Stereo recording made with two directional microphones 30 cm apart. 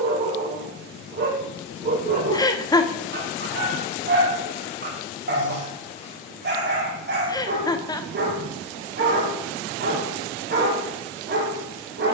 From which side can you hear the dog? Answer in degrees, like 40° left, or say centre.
40° right.